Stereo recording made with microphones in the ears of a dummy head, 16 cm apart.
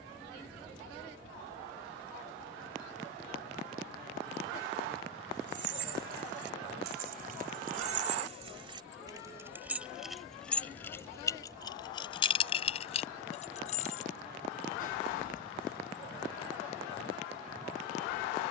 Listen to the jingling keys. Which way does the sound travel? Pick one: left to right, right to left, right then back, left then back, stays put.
right to left.